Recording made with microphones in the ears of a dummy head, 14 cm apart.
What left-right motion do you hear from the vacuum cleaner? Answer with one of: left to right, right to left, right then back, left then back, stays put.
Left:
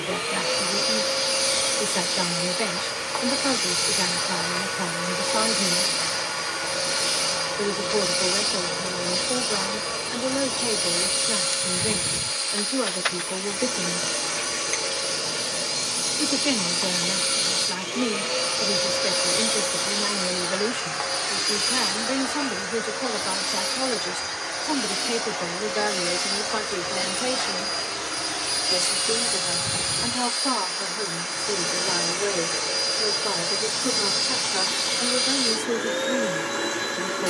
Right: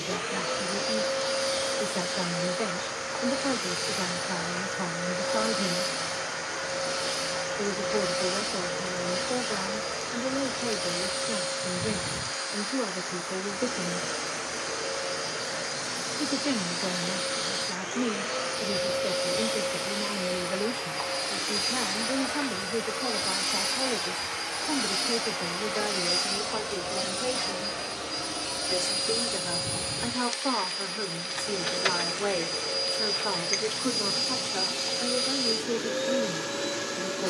right then back.